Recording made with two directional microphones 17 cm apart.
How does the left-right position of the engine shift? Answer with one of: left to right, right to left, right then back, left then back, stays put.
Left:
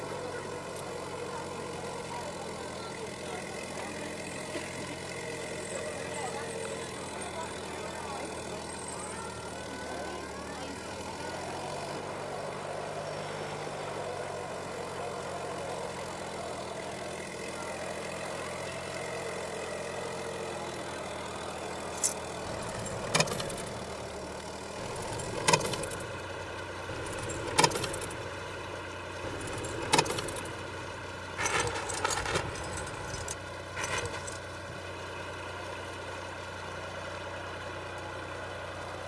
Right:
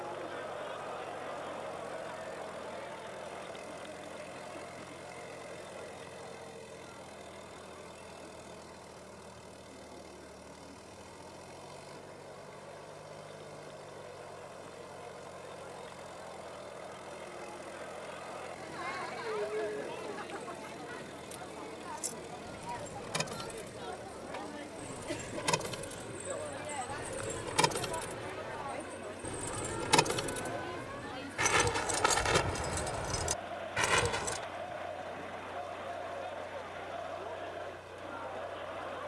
stays put.